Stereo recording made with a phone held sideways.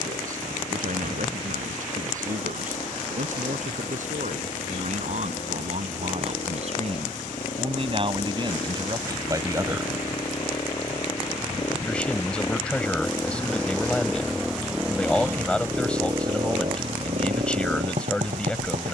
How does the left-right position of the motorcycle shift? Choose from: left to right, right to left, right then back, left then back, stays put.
left to right.